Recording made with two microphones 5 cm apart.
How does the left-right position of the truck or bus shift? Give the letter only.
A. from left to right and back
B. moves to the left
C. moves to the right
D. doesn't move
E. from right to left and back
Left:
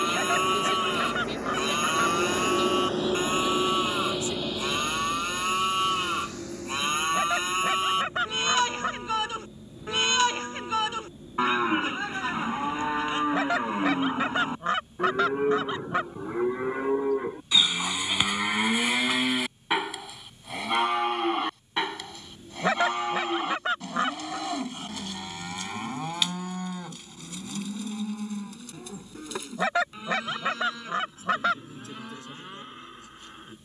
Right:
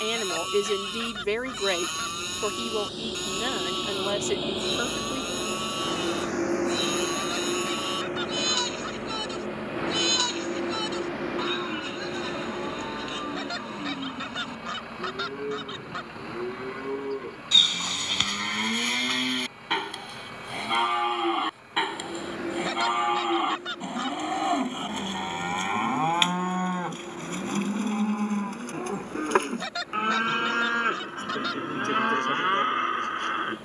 C.